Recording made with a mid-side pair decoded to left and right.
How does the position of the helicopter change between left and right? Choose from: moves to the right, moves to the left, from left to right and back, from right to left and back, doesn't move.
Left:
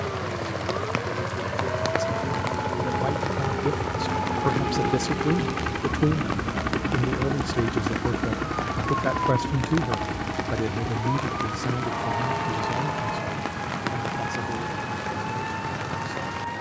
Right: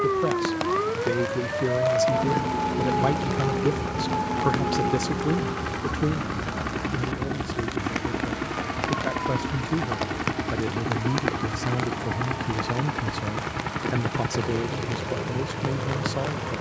moves to the right.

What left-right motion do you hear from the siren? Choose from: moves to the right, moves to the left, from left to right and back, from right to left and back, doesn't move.
moves to the left.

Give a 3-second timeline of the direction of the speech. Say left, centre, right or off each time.
right, centre, left, centre, right, right.